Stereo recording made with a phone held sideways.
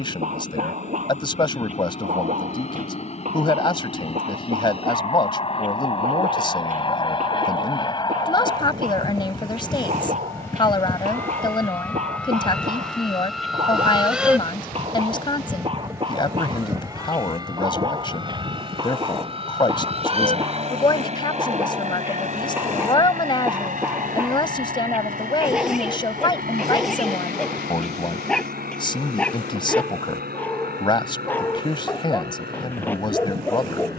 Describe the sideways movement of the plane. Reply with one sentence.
You can hear the plane move to the right.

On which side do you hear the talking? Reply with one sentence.
You can hear the talking on the left.